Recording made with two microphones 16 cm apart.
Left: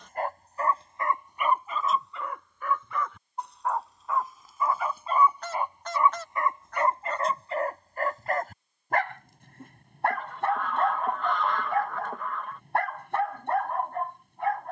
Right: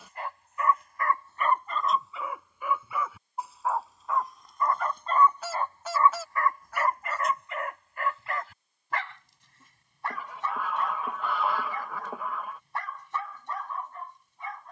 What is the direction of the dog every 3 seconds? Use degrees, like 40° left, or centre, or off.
10° left, centre, 30° left, 60° left, 60° left.